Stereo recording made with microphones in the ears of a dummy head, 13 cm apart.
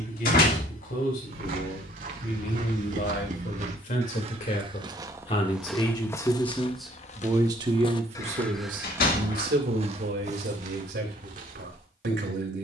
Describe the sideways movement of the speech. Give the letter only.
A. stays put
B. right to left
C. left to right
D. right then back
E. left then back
C.